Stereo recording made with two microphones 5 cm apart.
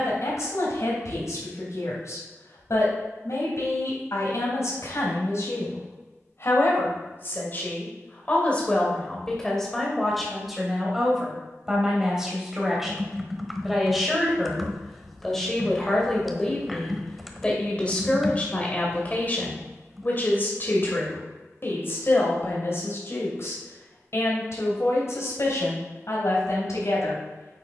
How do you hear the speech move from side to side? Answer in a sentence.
In this clip you hear the speech go right and come back.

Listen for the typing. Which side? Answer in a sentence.
In this clip you hear the typing in the centre.